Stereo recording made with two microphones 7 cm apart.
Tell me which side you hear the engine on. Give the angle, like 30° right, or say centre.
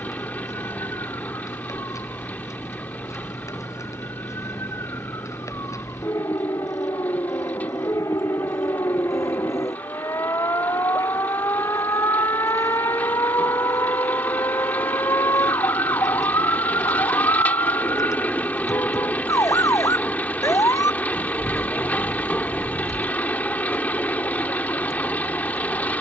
20° left.